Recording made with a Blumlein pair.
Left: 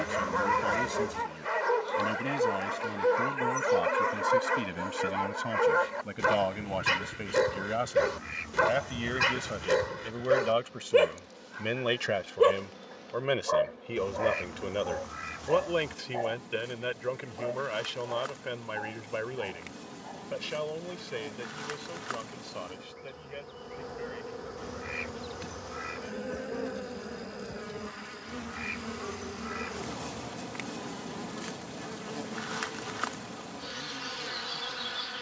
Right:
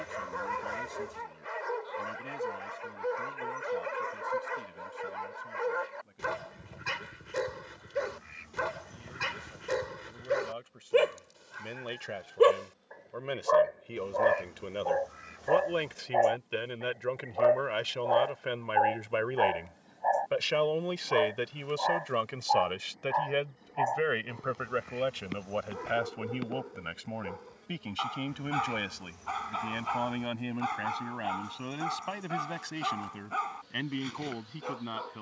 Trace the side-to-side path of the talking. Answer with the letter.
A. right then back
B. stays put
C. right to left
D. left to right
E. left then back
D.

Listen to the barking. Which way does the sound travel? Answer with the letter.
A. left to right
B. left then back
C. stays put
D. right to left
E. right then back
A.